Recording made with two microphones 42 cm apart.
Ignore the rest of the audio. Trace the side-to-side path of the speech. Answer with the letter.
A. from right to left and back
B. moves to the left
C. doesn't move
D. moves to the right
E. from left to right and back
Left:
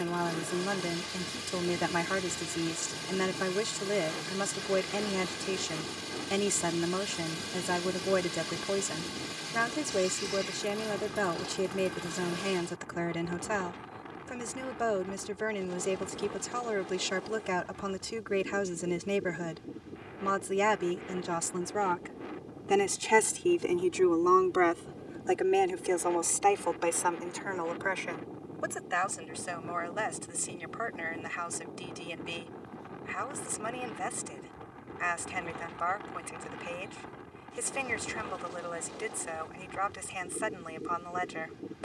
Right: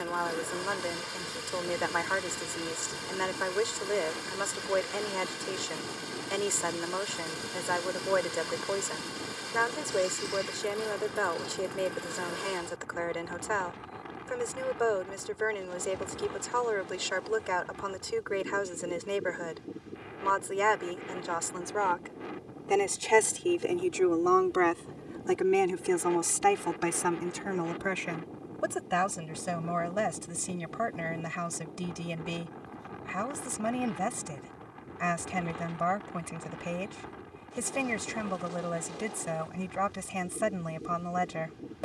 D.